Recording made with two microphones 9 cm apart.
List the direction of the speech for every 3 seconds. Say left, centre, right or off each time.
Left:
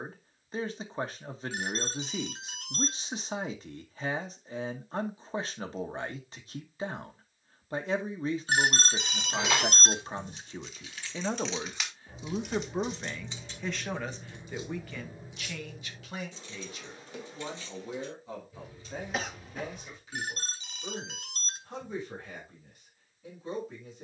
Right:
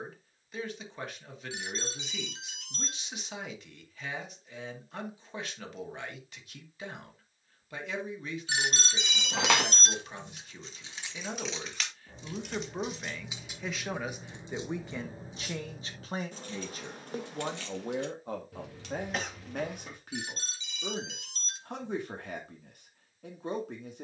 left, left, left, left, centre, right, right, right.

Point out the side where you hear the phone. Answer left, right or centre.
left.